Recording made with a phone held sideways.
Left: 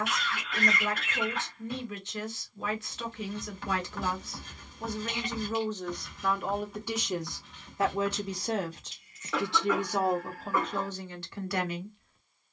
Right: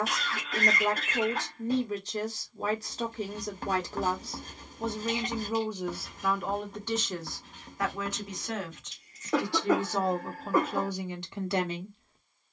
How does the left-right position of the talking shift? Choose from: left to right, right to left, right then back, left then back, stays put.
left then back.